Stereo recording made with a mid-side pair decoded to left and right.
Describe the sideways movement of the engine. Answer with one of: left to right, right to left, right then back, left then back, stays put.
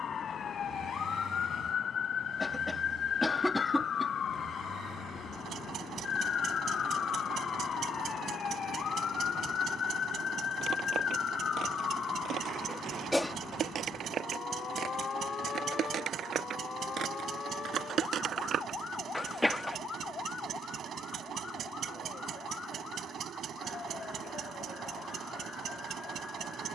stays put.